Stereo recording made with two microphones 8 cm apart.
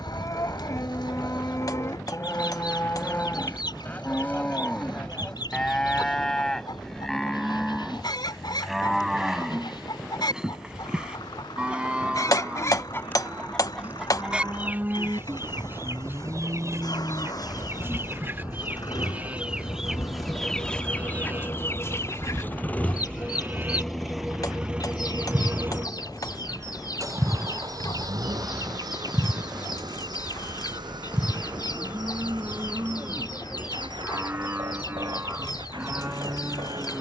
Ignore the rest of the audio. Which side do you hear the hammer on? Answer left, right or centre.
left.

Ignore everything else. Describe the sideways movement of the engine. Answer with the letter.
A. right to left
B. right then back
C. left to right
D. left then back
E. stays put
C.